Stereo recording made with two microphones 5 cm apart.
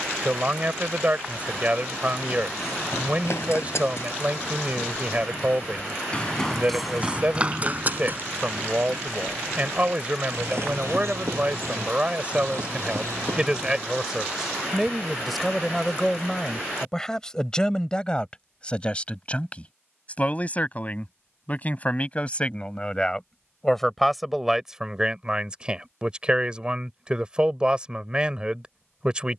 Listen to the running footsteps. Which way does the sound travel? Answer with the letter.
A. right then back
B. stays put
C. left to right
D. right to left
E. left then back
C.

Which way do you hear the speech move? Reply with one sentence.
In this clip you hear the speech move from right to left and back again.